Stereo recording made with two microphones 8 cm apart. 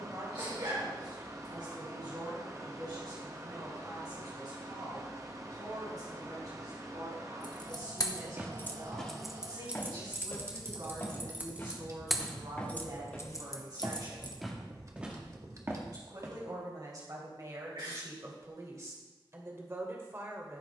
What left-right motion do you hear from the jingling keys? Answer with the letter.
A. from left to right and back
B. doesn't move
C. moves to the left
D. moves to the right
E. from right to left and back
A.